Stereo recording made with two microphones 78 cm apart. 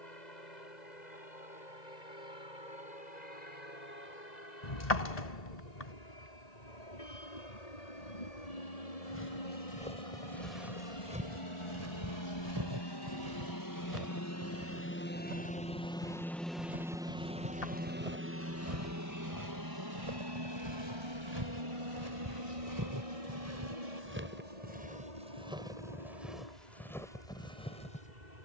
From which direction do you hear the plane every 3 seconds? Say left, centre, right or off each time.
left, left, left, left, left, centre, right, right, right, right.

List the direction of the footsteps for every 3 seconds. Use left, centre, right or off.
off, off, off, centre, right, right, right, right, centre, centre.